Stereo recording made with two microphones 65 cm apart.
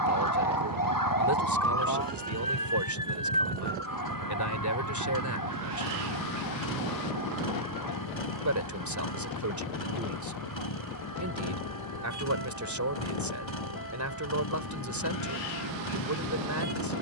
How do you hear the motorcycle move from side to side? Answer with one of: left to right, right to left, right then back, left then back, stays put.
stays put.